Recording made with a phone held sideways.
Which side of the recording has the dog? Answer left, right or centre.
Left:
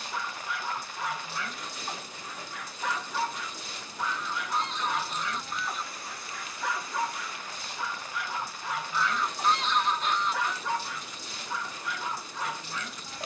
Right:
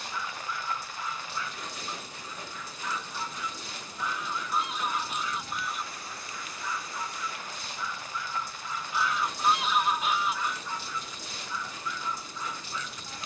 left.